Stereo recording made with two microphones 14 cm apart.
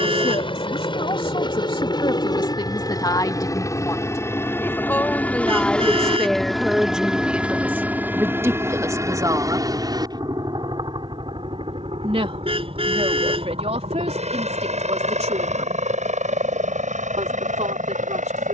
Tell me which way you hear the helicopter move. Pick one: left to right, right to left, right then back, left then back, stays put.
left to right.